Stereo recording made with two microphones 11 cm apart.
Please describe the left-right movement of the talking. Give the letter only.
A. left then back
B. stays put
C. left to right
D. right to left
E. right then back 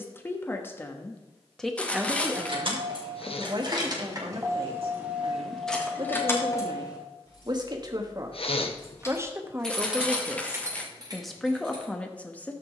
E.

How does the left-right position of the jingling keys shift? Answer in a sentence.
In this clip you hear the jingling keys go left and come back.